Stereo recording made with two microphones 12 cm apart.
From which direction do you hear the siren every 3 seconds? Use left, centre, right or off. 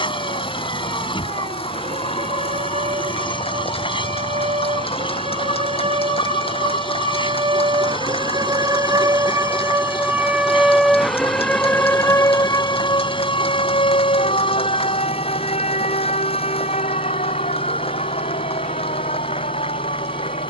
right, right, right, centre, left, left, left.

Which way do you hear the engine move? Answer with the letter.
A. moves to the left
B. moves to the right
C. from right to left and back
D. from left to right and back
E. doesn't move
E.